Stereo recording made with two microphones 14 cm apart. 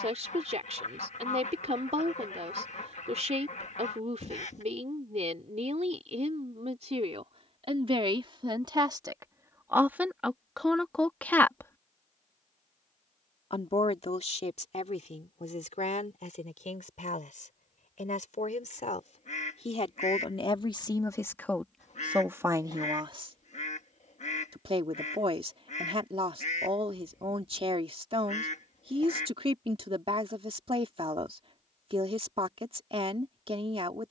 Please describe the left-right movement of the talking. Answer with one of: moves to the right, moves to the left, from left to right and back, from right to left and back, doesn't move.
from right to left and back.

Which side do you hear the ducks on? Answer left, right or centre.
left.